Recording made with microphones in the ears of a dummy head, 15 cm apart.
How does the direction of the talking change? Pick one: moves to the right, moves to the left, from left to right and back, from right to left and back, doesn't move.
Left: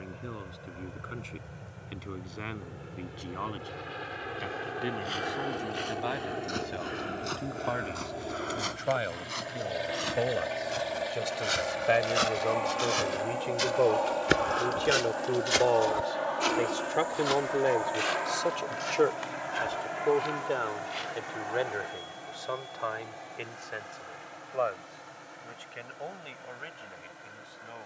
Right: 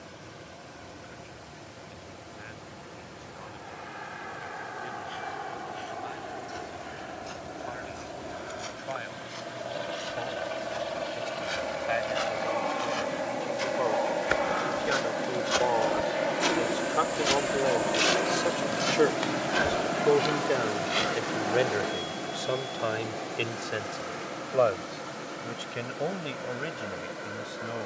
moves to the right.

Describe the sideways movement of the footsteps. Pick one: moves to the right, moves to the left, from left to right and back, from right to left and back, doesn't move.
moves to the right.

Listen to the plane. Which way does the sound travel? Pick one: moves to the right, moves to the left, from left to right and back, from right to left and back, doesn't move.
moves to the right.